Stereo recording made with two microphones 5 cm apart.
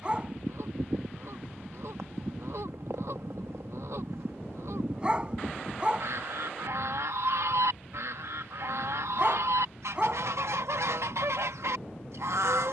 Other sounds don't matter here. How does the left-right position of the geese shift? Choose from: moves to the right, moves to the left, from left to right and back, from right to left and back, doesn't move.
doesn't move.